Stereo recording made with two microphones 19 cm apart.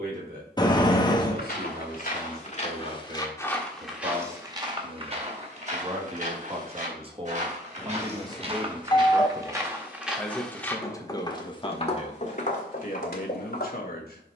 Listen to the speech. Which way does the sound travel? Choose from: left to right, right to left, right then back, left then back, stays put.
right to left.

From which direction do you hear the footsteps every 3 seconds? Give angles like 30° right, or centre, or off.
50° left, 20° right, 40° right, centre, 50° left.